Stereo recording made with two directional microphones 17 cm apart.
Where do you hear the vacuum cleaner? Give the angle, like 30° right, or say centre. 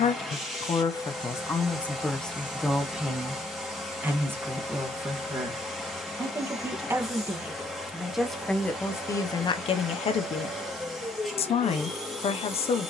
centre.